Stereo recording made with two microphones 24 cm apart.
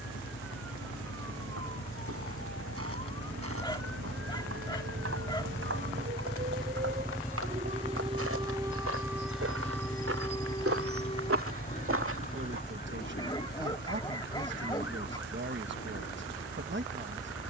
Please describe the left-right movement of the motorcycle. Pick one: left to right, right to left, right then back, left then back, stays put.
left to right.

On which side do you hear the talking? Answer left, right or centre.
right.